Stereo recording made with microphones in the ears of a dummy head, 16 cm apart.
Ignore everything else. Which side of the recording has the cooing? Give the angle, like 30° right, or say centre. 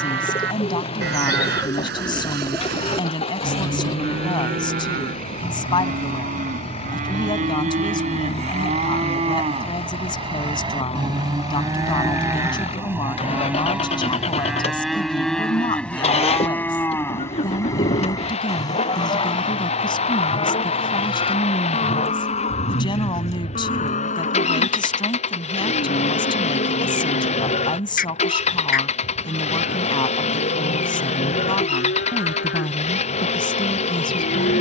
20° left.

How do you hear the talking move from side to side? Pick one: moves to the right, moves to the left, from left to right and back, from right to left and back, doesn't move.
doesn't move.